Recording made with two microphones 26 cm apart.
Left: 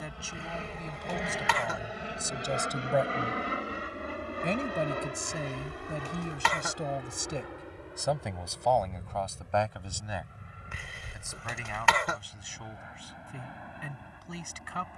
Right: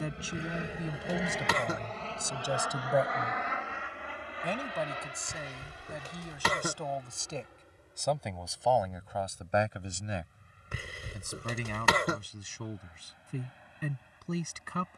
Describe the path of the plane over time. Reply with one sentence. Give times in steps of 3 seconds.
In this clip you hear the plane in the centre from 0 s and on the left from 3 s.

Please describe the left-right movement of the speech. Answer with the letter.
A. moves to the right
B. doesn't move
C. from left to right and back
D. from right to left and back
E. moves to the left
D.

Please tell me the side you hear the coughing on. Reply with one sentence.
In this clip you hear the coughing on the right.